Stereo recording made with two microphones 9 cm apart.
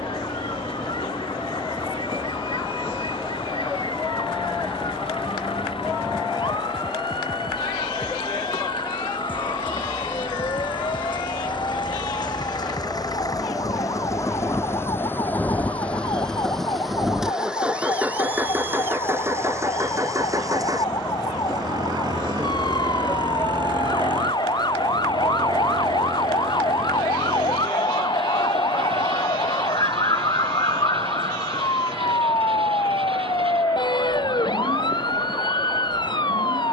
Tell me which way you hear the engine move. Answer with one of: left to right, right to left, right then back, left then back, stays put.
left to right.